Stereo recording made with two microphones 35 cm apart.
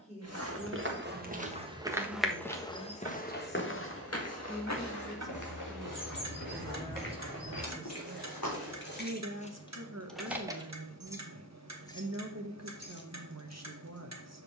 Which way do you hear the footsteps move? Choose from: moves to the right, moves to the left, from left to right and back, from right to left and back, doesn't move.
moves to the left.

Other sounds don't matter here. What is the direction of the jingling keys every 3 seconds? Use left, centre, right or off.
off, off, left, centre, left.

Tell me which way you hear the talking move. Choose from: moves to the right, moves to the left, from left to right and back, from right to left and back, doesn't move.
moves to the right.